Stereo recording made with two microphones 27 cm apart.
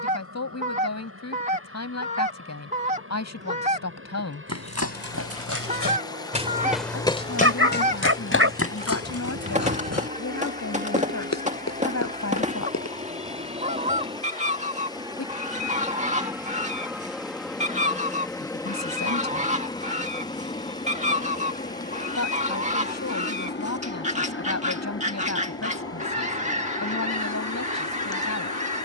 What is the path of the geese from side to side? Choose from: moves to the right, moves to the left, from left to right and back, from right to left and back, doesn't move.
doesn't move.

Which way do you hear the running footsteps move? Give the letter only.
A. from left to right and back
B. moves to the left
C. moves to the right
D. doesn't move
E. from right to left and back
B.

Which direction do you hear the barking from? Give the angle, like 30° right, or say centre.
50° right.